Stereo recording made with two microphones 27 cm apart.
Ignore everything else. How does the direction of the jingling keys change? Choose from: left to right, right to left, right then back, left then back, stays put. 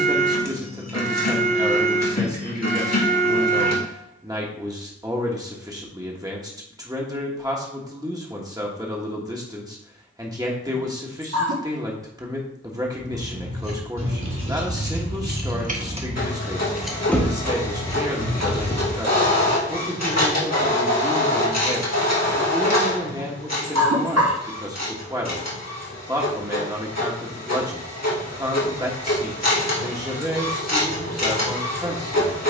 right to left.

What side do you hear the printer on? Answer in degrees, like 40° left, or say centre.
80° left.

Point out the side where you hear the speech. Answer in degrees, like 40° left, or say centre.
10° right.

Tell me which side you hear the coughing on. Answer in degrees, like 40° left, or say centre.
70° right.